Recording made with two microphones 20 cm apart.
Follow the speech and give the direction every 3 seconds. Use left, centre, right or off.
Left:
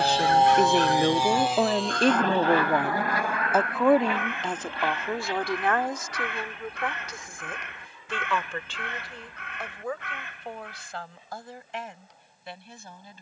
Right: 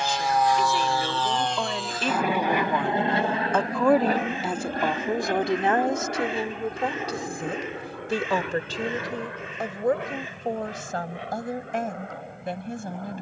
left, centre, right, right, right.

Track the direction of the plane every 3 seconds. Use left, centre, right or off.
centre, right, right, right, right.